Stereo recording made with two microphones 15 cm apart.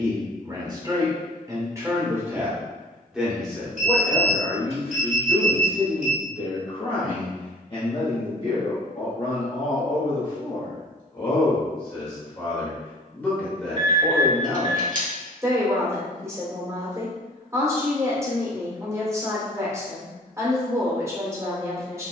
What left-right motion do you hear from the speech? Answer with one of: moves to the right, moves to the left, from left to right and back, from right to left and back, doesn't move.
from right to left and back.